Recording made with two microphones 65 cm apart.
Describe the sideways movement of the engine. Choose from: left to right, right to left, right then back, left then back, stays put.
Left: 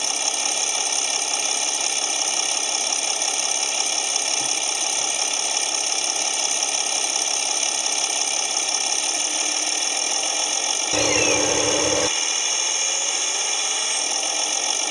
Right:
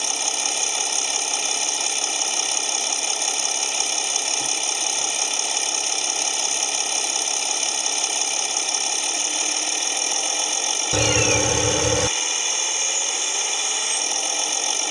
stays put.